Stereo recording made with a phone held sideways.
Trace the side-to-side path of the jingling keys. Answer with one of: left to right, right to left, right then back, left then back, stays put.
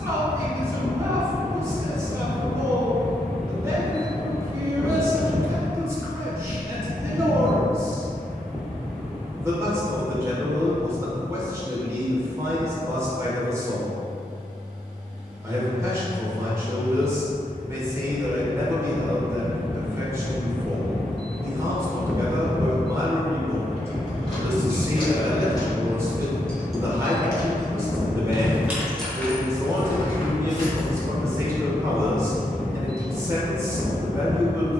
right then back.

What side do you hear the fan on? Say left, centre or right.
centre.